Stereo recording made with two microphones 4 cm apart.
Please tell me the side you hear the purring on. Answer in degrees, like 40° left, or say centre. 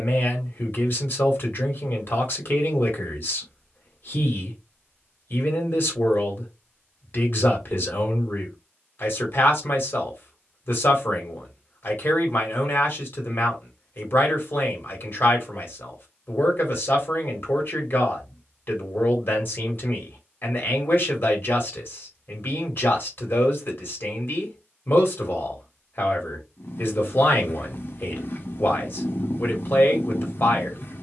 50° left.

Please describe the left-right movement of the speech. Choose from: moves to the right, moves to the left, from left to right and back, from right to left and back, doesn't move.
doesn't move.